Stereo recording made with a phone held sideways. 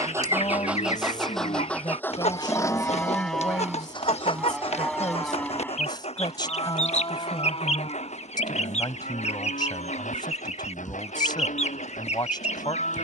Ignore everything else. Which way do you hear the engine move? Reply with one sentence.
You can hear the engine travel towards the left.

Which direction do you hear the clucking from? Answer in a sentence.
In this clip you hear the clucking on the left.